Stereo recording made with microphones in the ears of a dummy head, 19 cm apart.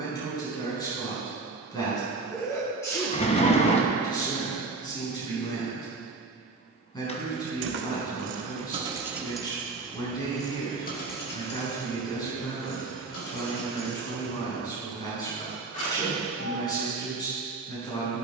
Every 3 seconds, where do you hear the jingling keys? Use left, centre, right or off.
off, off, right, left, left, left.